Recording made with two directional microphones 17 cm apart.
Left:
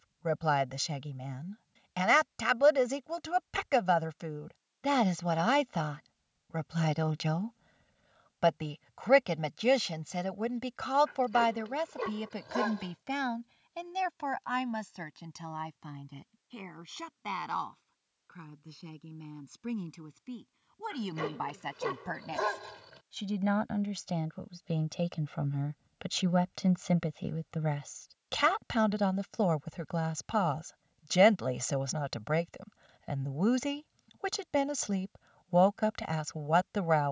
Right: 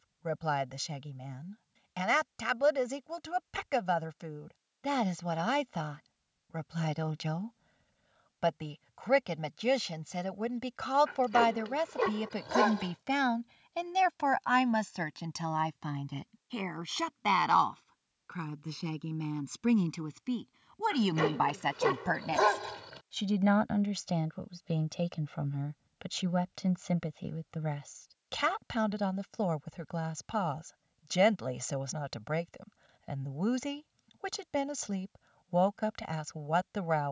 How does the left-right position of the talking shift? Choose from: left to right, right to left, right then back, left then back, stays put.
right then back.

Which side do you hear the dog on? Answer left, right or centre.
right.